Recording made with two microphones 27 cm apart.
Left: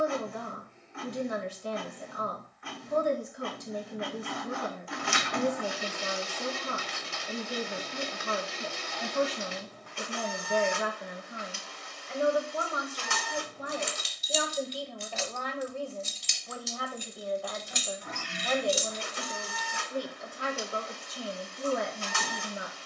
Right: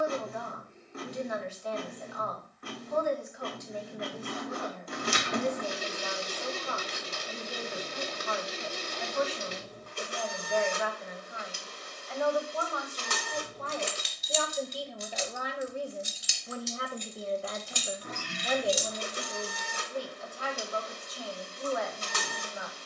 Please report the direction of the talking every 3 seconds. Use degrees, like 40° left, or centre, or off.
40° left, 40° left, 40° left, 40° left, 10° left, 20° right, 10° left, 40° left.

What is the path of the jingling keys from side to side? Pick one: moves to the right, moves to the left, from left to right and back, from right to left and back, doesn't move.
moves to the left.